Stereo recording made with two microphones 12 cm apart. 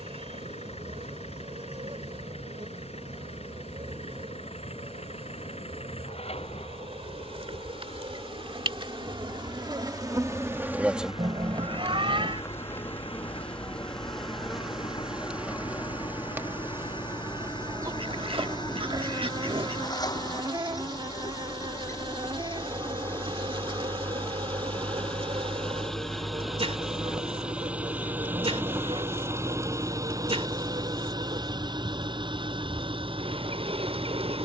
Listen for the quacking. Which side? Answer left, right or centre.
right.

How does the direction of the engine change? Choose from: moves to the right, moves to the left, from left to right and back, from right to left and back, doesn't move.
moves to the right.